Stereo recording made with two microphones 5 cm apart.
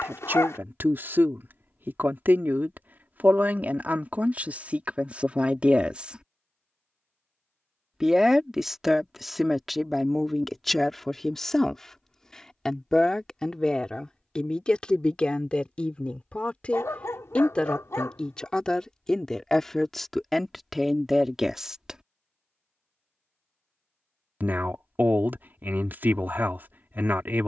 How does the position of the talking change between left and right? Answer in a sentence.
In this clip you hear the talking move from right to left and back again.